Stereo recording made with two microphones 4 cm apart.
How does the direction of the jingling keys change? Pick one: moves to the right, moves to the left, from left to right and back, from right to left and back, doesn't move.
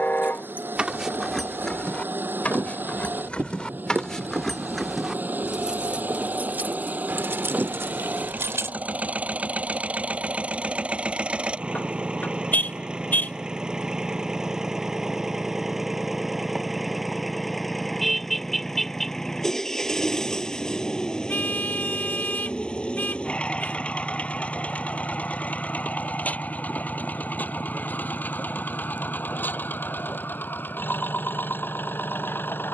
from right to left and back.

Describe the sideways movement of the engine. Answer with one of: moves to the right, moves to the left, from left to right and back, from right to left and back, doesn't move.
moves to the left.